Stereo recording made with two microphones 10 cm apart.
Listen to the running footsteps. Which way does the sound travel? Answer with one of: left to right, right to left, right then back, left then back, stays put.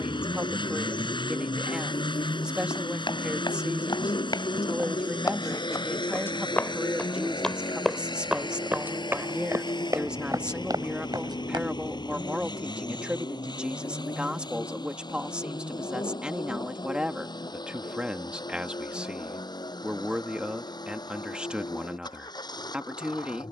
left to right.